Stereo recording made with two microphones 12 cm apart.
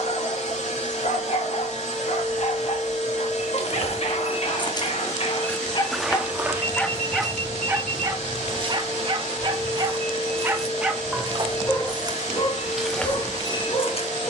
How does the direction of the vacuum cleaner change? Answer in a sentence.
In this clip you hear the vacuum cleaner stay put.